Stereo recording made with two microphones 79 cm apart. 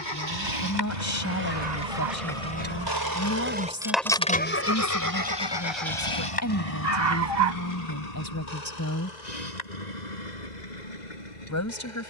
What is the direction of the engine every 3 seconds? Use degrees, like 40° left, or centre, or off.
60° right, 10° left, 50° left, 60° left.